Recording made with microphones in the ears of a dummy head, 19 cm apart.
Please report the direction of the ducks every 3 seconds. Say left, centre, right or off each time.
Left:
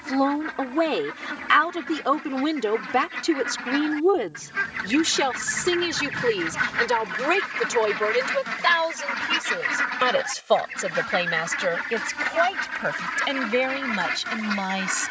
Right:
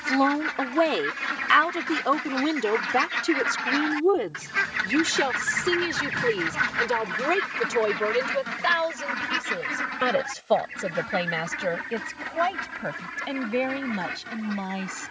right, right, centre, left, left.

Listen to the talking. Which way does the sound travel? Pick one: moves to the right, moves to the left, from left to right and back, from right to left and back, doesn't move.
moves to the left.